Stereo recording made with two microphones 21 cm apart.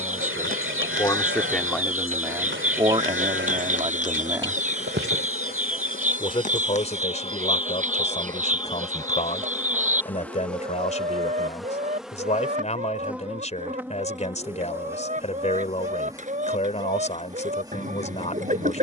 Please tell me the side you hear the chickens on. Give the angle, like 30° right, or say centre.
40° right.